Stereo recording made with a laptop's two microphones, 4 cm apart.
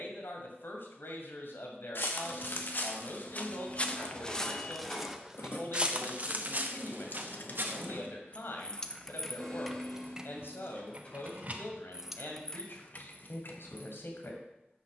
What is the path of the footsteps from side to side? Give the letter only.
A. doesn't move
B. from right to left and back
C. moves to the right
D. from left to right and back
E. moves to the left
C.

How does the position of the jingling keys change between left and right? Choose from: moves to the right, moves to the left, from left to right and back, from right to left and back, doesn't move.
from left to right and back.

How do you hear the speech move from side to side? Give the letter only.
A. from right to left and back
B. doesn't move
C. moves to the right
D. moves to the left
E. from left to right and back
B.